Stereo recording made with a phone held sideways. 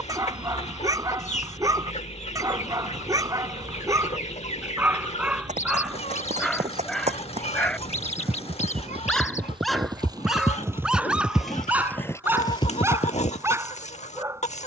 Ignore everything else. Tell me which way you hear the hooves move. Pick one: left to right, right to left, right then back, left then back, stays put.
right to left.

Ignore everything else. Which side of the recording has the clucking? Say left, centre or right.
left.